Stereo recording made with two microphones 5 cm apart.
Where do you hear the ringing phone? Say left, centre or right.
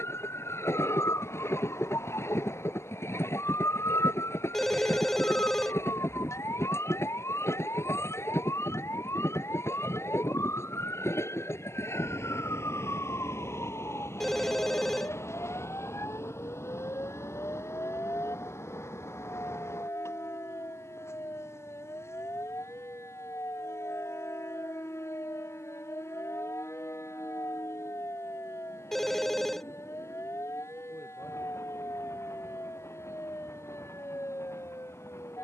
centre.